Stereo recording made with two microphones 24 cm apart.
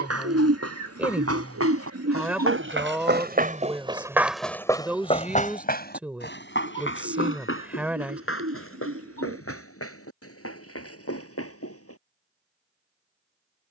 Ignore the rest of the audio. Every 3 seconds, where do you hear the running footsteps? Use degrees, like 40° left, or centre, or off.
70° right, centre, 60° left, 70° left, off.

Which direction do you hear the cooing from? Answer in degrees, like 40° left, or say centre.
80° right.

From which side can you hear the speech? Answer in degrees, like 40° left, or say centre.
10° right.